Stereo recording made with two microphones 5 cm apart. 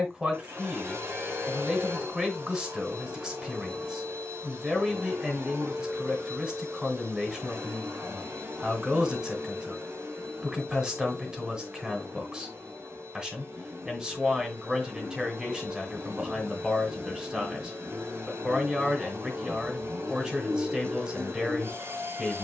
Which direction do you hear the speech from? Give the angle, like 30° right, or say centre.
20° right.